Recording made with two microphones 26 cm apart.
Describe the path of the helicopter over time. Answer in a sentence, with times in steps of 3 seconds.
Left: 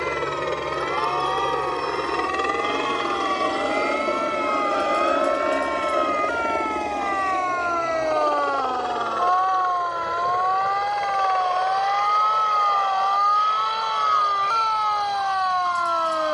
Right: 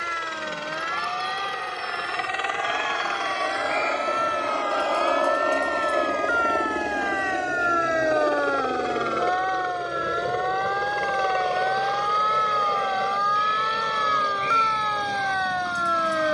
You can hear the helicopter on the left from 0 s, in the centre from 6 s and on the right from 9 s.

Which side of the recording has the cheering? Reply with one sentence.
You can hear the cheering on the right.